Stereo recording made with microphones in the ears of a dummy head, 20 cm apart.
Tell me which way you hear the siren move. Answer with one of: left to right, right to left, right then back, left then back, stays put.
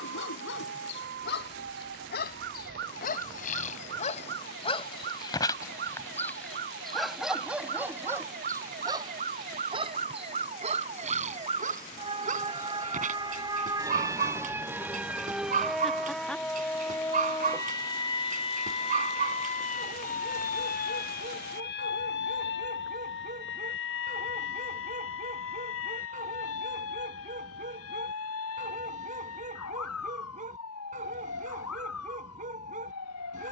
right to left.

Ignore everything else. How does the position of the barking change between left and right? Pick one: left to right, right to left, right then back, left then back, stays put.
left to right.